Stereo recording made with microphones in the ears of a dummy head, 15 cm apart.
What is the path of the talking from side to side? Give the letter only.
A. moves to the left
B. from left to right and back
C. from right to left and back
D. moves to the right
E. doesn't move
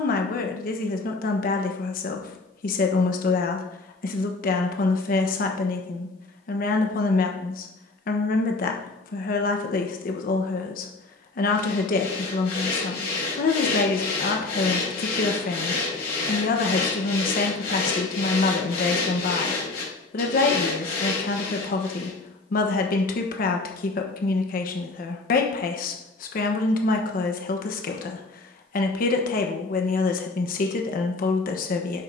E.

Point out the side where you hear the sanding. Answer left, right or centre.
left.